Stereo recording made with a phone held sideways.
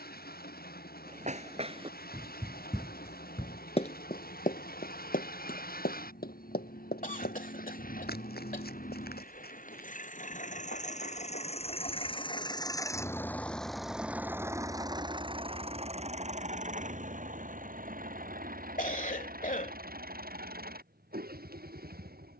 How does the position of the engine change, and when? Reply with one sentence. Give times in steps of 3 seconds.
In this clip you hear the engine on the left from 0 s, in the centre from 12 s and on the right from 15 s.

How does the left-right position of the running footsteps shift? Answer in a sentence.
In this clip you hear the running footsteps move from right to left.